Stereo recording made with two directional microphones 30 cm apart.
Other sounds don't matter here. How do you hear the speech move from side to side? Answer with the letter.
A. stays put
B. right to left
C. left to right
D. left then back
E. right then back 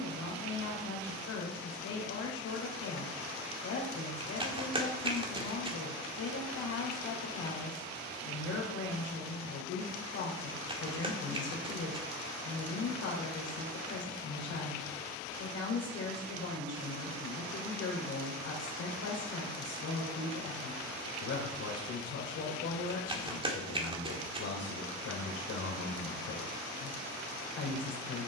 A.